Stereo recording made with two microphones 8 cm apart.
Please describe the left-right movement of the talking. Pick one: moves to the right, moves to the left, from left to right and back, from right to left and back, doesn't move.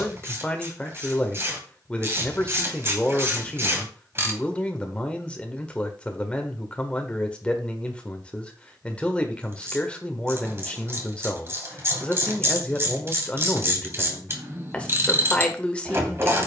doesn't move.